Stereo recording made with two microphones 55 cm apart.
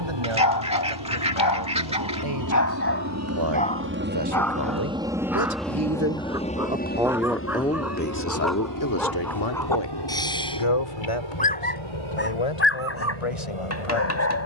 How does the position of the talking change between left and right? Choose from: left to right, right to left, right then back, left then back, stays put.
right to left.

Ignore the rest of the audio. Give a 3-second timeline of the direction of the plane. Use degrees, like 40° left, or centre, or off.
50° right, 10° right, 20° left, 40° left, 50° left.